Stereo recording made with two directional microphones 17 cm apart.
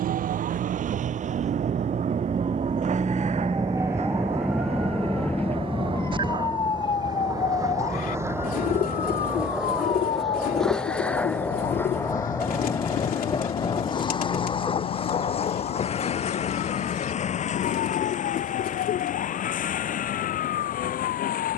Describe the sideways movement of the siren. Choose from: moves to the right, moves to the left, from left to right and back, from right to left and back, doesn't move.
moves to the left.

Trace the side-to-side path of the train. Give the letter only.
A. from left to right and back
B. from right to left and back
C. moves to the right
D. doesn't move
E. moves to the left
E.